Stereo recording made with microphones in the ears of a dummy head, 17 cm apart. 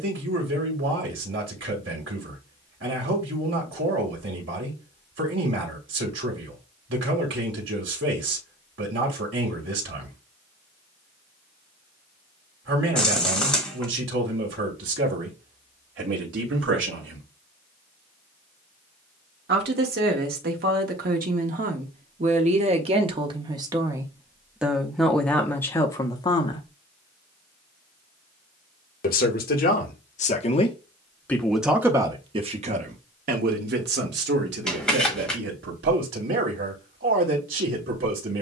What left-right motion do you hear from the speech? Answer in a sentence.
In this clip you hear the speech go left and come back.